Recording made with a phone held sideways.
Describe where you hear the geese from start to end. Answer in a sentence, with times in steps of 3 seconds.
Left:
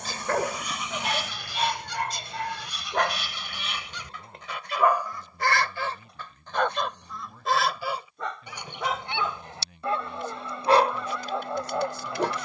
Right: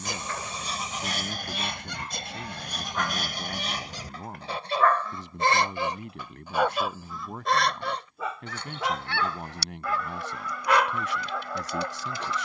In this clip you hear the geese on the right from 0 s, in the centre from 6 s and on the left from 9 s.